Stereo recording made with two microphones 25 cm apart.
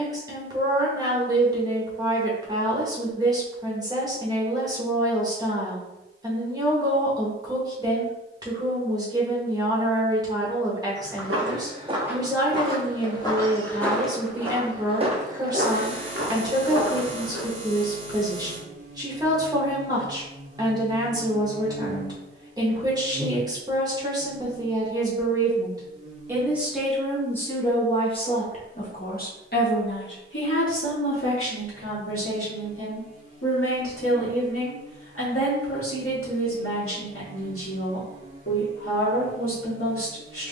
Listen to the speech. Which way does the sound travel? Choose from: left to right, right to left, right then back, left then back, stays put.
right to left.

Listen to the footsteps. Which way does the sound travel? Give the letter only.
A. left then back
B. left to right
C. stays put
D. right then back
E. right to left
A.